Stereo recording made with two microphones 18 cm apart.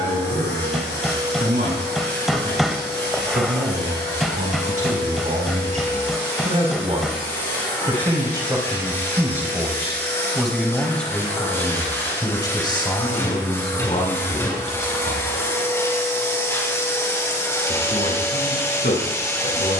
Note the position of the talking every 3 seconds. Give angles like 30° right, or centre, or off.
60° right, 50° right, 30° right, centre, 30° left, 50° left, 60° left.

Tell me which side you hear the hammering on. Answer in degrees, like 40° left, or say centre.
centre.